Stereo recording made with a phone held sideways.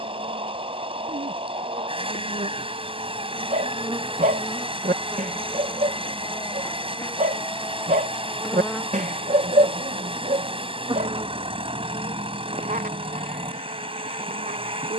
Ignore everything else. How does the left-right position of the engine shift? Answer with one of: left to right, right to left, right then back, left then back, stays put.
stays put.